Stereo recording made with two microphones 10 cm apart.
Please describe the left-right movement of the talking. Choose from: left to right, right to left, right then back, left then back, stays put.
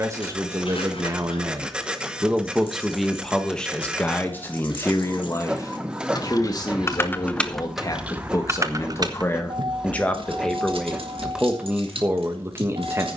left then back.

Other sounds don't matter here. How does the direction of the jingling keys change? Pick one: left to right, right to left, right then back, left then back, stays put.
left to right.